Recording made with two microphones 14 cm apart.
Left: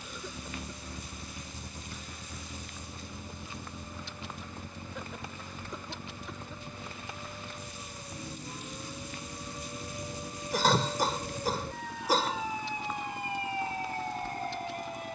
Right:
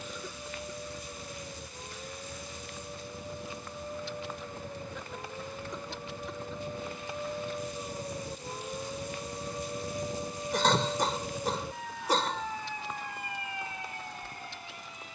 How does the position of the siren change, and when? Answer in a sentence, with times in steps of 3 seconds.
You can hear the siren on the right from 0 s and on the left from 12 s.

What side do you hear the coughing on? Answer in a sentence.
In this clip you hear the coughing in the centre.